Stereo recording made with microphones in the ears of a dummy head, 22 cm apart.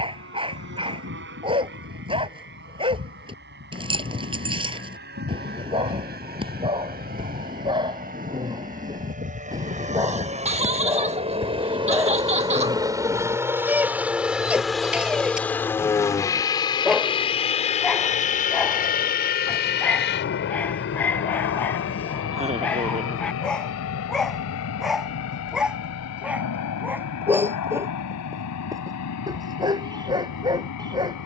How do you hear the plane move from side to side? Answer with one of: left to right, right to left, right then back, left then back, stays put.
right to left.